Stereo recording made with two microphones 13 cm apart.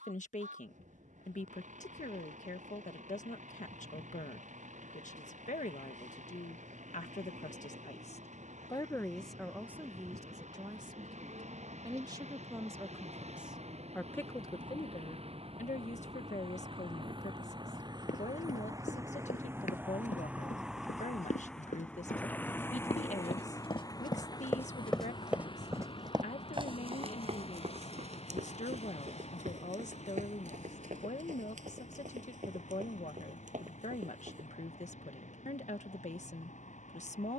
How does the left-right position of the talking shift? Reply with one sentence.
In this clip you hear the talking go right and come back.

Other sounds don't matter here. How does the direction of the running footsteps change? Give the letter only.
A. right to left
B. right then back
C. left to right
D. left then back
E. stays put
C.